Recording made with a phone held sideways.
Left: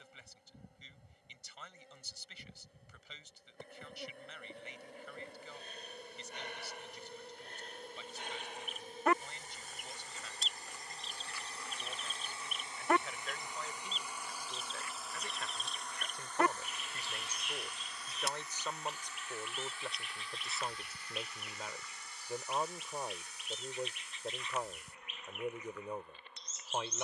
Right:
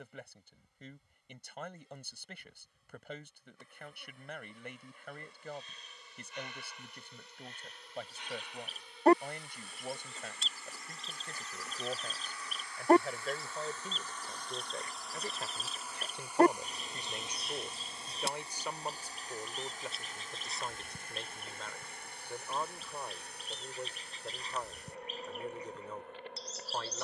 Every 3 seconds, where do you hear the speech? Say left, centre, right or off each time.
right, right, right, right, right, right, centre, centre, centre.